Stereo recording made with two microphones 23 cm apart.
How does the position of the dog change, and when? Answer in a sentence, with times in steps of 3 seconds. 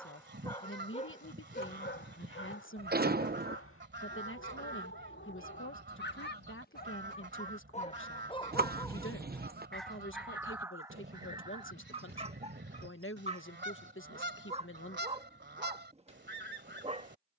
You can hear the dog on the left from 0 s, in the centre from 9 s and on the right from 12 s.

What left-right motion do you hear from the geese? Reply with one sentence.
In this clip you hear the geese stay in one place.